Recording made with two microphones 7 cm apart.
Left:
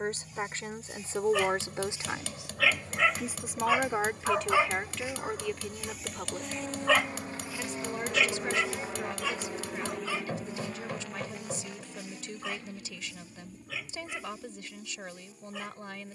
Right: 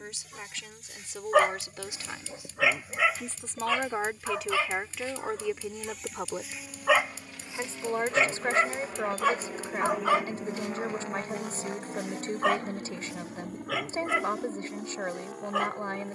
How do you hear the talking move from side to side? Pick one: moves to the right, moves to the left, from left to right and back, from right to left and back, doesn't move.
moves to the right.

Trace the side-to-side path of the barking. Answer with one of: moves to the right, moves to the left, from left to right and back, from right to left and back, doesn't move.
from right to left and back.